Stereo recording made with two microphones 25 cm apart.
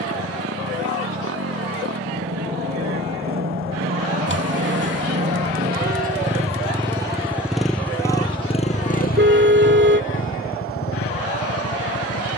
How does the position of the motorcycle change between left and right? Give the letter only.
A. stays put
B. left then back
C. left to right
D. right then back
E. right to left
E.